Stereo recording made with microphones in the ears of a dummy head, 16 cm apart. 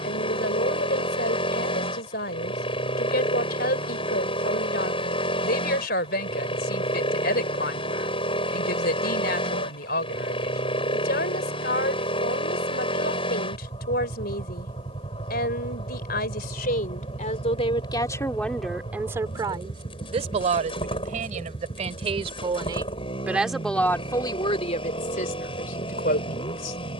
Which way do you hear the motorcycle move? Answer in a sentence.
You can hear the motorcycle stay put.